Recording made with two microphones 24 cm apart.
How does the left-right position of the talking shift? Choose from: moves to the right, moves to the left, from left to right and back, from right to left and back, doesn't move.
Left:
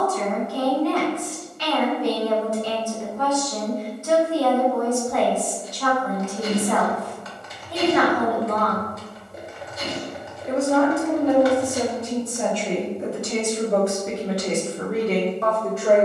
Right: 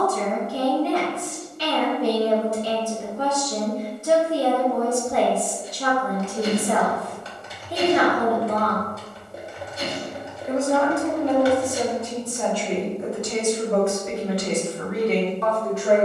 moves to the left.